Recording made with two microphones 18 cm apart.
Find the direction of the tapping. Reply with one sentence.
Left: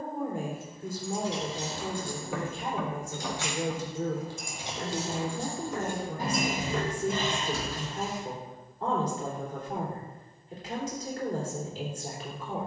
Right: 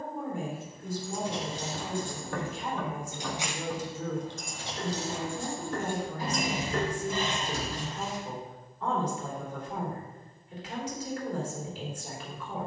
In this clip you hear the tapping in the centre.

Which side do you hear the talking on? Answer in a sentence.
In this clip you hear the talking on the left.